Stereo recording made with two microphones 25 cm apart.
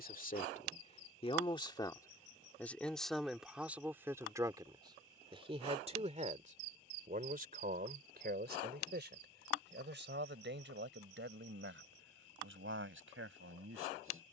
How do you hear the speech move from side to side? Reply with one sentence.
In this clip you hear the speech move from left to right.